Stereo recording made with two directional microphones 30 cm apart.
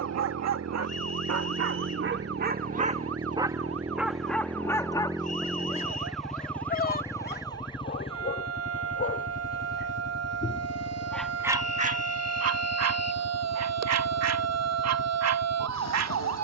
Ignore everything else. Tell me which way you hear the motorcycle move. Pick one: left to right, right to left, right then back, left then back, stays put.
right to left.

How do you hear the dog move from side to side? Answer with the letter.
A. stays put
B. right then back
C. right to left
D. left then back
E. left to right
D.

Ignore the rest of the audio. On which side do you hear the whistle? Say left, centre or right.
left.